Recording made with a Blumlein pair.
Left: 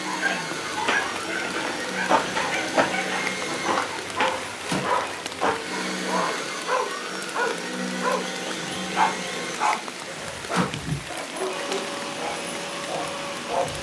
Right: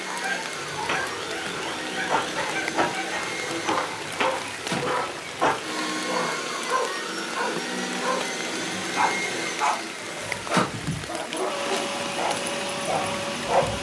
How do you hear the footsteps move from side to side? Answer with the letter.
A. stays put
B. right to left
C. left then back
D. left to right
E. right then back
D.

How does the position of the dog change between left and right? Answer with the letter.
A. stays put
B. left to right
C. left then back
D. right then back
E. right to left
B.